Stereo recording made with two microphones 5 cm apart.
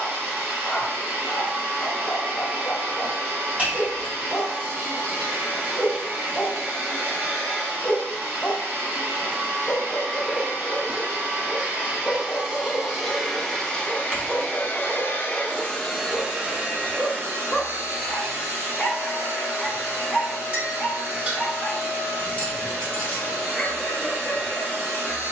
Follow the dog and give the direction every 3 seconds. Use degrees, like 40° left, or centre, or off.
30° left, 30° left, 30° left, 30° left, 20° left, 10° right, 10° right, 20° left, 20° left.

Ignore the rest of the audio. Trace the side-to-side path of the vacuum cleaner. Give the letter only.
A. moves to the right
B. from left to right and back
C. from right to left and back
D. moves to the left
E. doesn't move
C.